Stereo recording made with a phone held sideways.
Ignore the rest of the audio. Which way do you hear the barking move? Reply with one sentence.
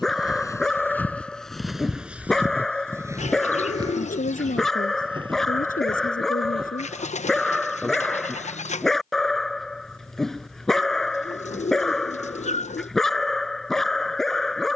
You can hear the barking stay in one place.